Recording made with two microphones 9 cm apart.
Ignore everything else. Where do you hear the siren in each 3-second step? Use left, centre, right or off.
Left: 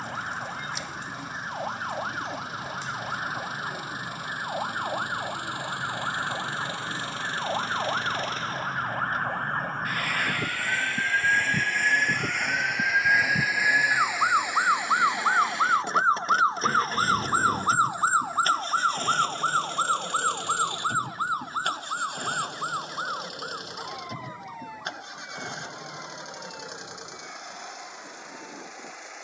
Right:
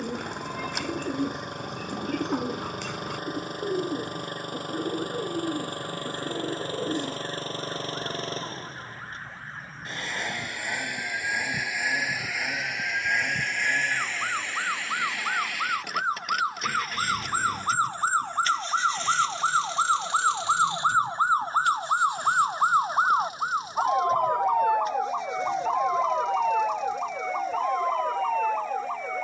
left, left, left, left, left, left, centre, right, right, right.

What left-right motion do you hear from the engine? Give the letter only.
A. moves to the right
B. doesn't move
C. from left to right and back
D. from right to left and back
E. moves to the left
E.